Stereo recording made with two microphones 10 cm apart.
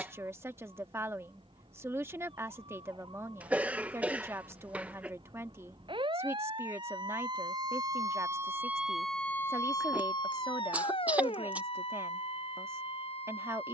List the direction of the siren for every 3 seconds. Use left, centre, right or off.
right, right, right, left, left.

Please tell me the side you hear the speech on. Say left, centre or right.
right.